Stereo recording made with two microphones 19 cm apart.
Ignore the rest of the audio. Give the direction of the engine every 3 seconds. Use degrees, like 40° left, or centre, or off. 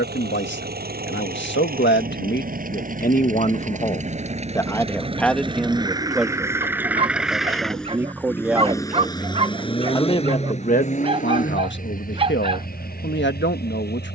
50° right, 30° right, centre, 40° left, 50° left.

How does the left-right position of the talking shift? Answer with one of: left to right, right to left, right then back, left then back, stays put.
right then back.